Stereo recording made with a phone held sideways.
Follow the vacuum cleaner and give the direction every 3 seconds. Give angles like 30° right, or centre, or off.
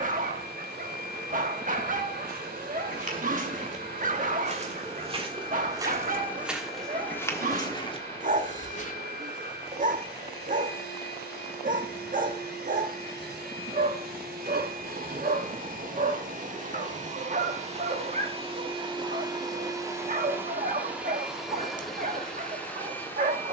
70° right, 70° right, 70° right, 70° right, 70° right, 50° right, 20° right, centre.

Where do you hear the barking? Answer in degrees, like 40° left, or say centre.
50° right.